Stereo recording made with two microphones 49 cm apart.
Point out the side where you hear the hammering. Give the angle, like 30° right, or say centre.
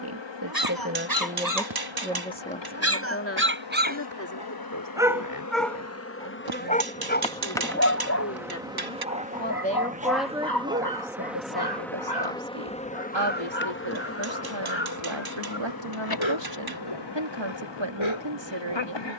50° right.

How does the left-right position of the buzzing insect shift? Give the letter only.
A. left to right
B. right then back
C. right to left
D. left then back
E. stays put
B.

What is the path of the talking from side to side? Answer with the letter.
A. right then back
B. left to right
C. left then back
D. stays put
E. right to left
C.